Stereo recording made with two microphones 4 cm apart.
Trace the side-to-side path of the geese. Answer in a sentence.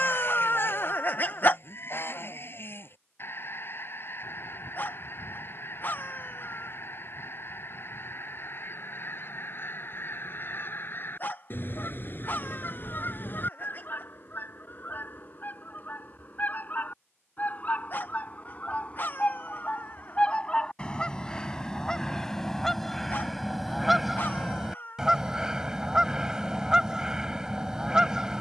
You can hear the geese move to the right.